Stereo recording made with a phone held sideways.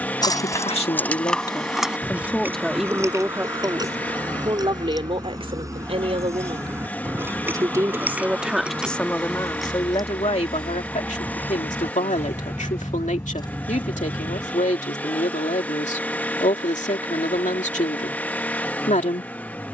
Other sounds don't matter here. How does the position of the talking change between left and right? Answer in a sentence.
In this clip you hear the talking move from left to right and back again.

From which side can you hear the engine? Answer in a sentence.
In this clip you hear the engine in the centre.